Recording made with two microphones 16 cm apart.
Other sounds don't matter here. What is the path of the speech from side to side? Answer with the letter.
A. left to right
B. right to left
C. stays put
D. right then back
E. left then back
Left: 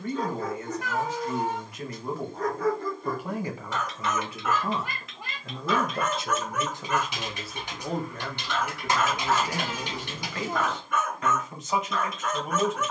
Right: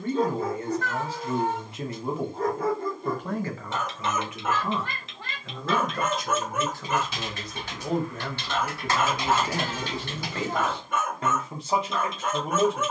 E.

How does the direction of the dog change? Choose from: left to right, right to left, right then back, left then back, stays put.
stays put.